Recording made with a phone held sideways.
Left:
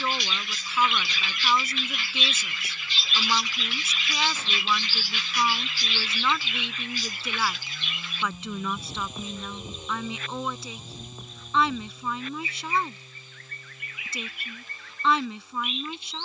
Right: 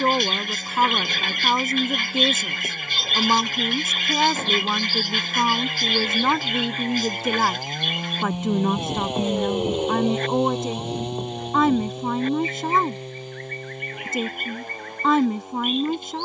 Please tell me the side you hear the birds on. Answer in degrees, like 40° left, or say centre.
50° right.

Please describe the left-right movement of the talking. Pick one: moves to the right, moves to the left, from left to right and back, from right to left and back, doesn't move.
doesn't move.